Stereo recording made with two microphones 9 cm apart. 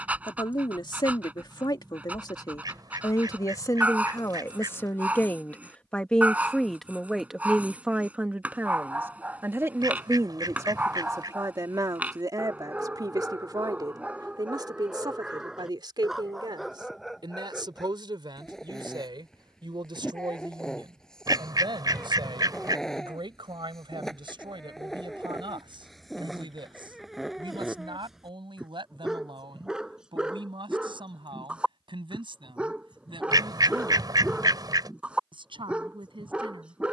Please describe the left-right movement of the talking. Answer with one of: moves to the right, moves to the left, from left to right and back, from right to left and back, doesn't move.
moves to the right.